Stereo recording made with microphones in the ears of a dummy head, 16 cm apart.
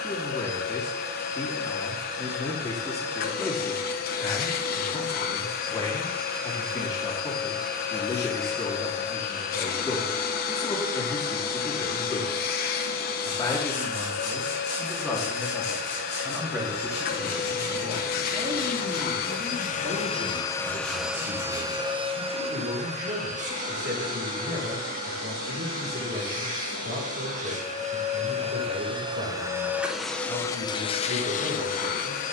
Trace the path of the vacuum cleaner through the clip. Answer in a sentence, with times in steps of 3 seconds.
You can hear the vacuum cleaner on the left from 0 s, on the right from 21 s and on the left from 30 s.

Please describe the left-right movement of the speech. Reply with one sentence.
In this clip you hear the speech move to the right.